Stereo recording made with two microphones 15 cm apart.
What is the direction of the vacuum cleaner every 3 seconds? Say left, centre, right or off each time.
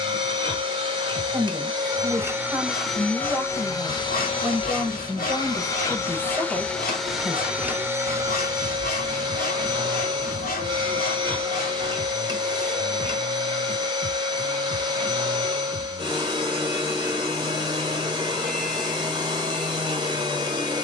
right, left, centre, right, right, right, right.